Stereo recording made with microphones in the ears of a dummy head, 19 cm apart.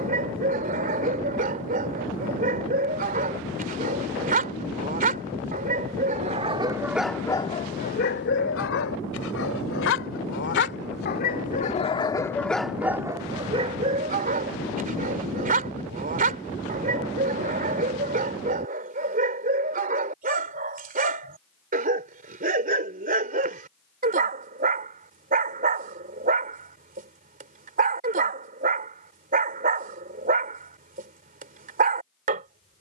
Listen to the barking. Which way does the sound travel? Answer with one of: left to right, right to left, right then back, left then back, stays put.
left then back.